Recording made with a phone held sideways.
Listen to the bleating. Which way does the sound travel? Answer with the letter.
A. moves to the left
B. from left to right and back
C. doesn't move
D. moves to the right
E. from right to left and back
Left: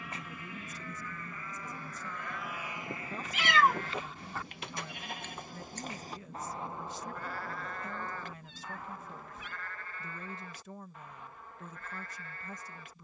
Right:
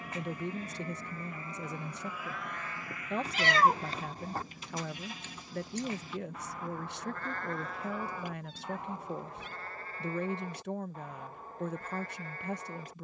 E.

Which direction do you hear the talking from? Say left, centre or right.
right.